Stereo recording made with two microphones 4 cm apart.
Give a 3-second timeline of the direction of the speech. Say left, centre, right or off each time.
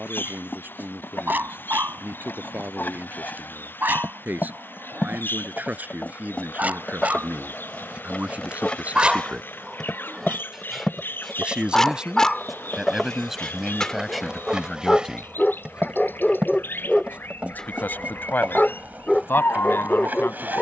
right, right, right, right, centre, left, left.